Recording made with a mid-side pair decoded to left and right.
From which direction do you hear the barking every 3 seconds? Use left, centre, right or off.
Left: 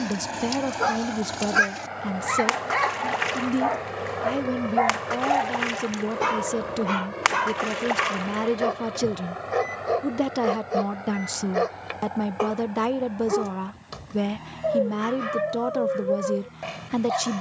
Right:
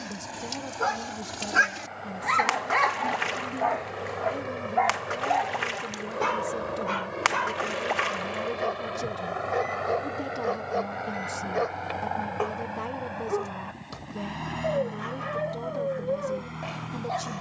centre, centre, left, left, left, left.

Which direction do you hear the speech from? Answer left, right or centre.
left.